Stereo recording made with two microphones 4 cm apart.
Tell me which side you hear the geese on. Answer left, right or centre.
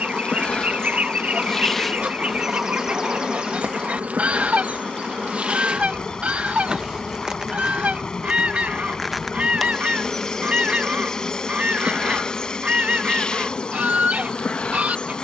right.